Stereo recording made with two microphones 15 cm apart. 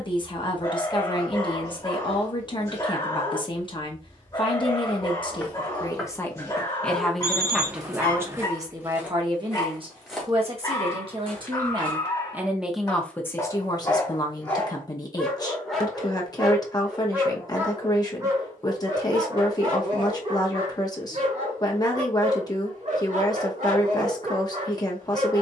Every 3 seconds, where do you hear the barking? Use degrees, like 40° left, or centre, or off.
20° left, 20° left, 20° left, 20° left, 20° left, 10° right, 30° right, 50° right, 60° right.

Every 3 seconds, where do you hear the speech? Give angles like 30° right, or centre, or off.
30° left, 30° left, centre, 30° right, 20° left, 30° left, 30° left, 30° left, 30° left.